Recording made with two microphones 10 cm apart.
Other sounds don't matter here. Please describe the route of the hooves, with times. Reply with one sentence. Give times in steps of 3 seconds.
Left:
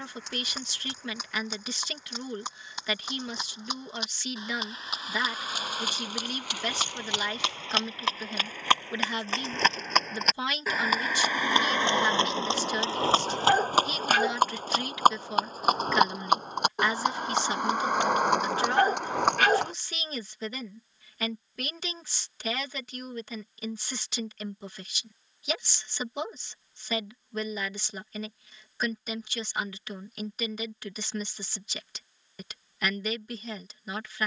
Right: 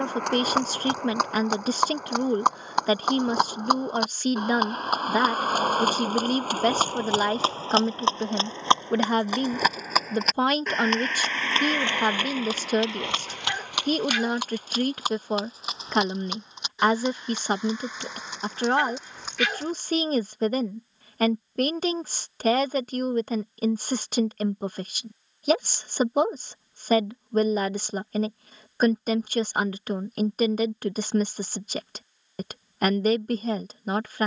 You can hear the hooves on the right from 0 s, in the centre from 9 s, on the left from 12 s and not at all from 21 s.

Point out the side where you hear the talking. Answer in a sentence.
In this clip you hear the talking on the right.